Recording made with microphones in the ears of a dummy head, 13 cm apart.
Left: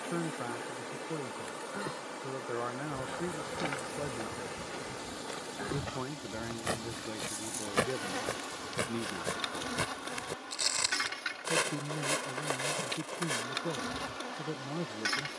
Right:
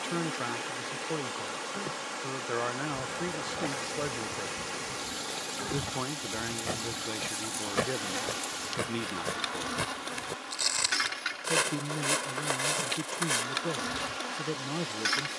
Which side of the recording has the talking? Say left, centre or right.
right.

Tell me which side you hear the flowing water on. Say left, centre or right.
right.